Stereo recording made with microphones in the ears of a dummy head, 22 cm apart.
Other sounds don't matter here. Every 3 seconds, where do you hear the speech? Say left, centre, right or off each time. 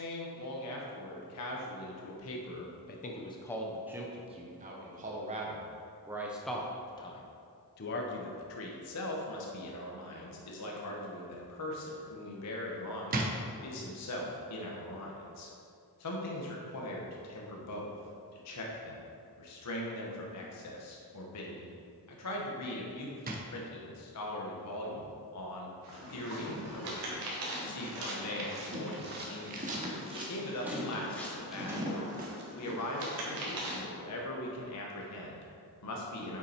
left, centre, left, left, left, left, left, left, left, left, left, left.